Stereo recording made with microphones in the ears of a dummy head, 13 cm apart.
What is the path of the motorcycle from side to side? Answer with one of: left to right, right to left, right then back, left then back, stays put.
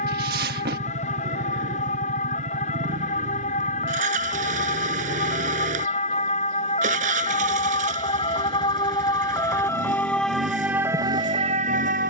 stays put.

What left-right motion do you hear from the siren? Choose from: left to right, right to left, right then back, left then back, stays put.
left to right.